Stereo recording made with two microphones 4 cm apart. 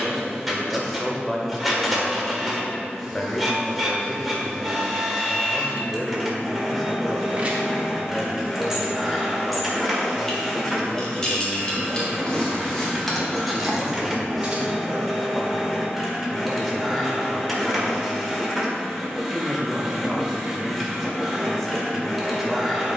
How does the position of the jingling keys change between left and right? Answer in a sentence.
In this clip you hear the jingling keys go left and come back.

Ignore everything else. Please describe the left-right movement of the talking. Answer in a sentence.
You can hear the talking stay put.